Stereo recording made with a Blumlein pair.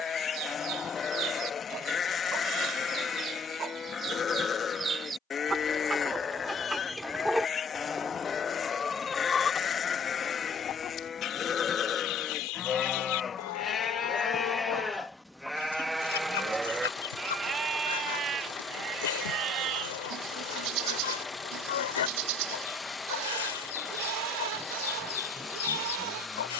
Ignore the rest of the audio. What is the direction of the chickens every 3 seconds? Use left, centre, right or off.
right, right, centre, left, left, left, left, left, left.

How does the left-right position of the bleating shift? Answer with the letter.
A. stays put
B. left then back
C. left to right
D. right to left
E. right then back
C.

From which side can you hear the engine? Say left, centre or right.
centre.